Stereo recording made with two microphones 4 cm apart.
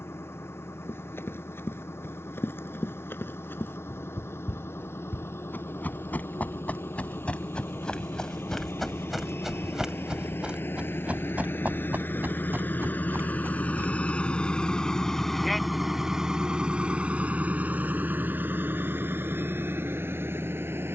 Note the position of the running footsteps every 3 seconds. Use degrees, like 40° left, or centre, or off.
60° left, 50° left, 20° left, 20° right, 50° right, off, off.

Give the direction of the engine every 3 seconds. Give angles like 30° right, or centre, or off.
70° left, 70° left, 70° left, 60° left, 40° left, 20° right, 60° right.